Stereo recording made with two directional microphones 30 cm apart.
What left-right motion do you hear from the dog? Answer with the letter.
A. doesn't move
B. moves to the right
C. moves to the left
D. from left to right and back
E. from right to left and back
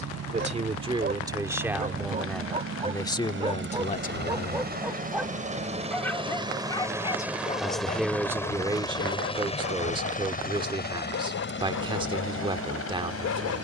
C.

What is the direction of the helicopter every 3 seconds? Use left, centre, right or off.
right, right, centre, left, left.